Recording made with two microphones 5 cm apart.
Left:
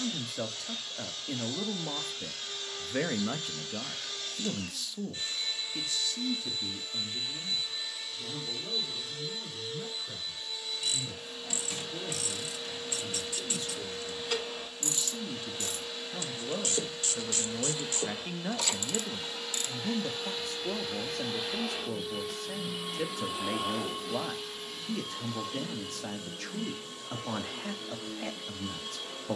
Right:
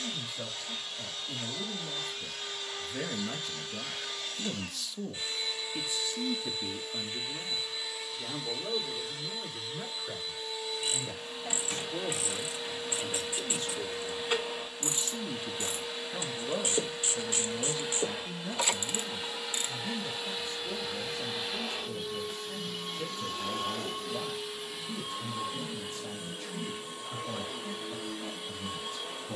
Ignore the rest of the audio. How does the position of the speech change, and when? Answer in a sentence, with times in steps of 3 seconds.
In this clip you hear the speech on the left from 0 s, in the centre from 3 s, on the right from 6 s, in the centre from 15 s and on the left from 18 s.